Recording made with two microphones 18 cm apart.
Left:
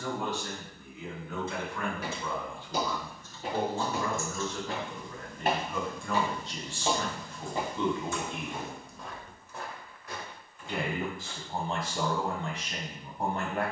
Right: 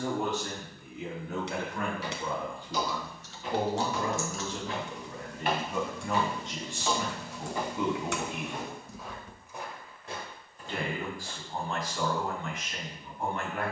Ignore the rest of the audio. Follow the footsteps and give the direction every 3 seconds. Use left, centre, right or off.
left, left, left, right, off.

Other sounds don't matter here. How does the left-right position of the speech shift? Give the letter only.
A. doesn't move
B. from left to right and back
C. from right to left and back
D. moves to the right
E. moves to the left
E.